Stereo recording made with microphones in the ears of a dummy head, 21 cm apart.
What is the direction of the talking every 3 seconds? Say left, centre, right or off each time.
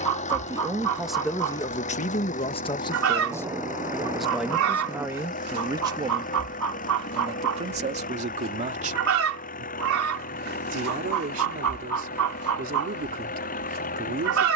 centre, centre, right, right, right.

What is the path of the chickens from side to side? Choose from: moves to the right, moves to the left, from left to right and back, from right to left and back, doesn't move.
doesn't move.